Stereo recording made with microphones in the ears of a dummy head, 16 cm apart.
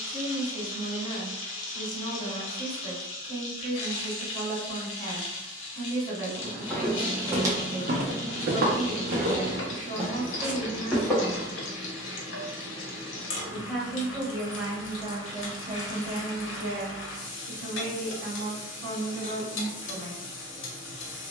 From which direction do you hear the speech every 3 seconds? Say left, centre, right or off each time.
left, left, left, left, centre, right, right.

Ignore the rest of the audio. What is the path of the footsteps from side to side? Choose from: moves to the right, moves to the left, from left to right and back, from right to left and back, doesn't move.
from left to right and back.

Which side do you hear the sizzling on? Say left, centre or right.
left.